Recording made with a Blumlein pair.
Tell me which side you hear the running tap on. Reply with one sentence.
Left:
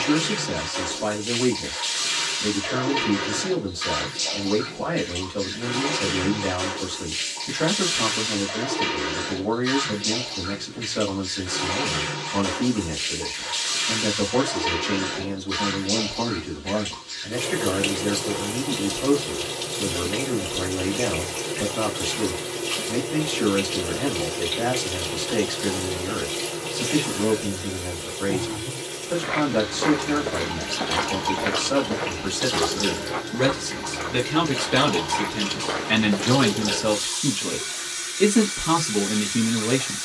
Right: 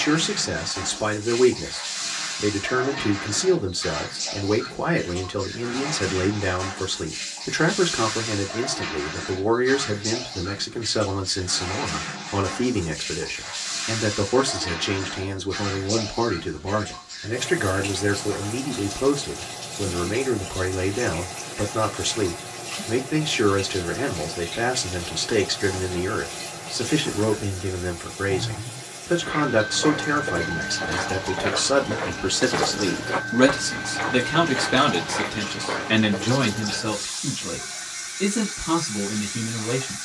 You can hear the running tap on the left.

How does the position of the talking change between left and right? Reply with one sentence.
You can hear the talking go from the right side to the left.